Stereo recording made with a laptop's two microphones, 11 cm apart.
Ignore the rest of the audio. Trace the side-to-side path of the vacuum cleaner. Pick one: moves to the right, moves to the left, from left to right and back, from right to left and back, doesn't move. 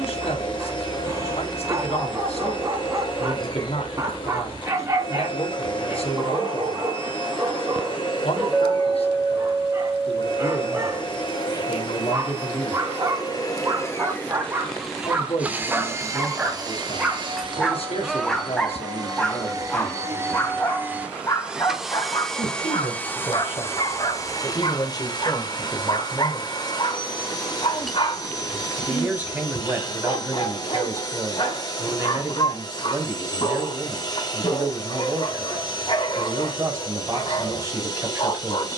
from left to right and back.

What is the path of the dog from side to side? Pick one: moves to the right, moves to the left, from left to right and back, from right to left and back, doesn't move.
moves to the left.